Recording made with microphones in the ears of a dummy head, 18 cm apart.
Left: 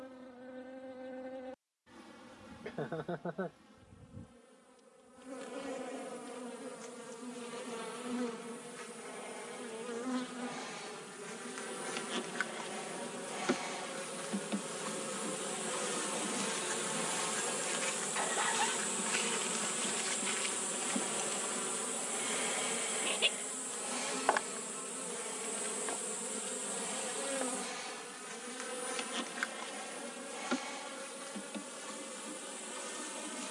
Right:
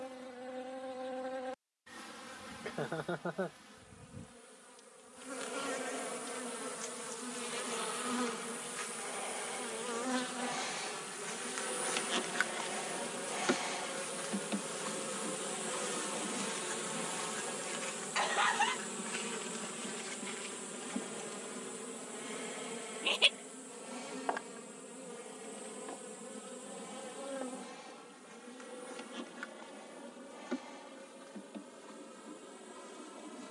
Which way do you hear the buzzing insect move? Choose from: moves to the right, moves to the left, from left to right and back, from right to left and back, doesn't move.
moves to the left.